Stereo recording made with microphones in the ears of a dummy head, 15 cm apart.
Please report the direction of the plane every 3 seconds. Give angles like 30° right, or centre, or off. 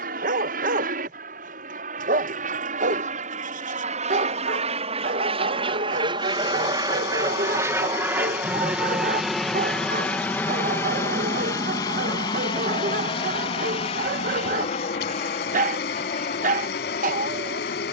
60° right, 40° right, 20° right, 10° left, 30° left, 50° left.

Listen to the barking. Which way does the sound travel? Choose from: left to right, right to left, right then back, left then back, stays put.
stays put.